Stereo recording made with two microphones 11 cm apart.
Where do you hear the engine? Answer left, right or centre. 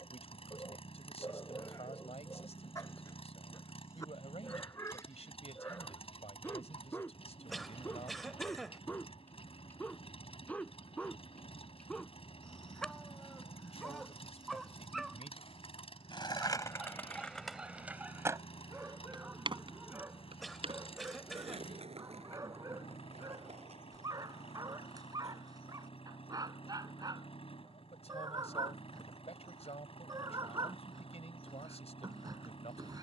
left.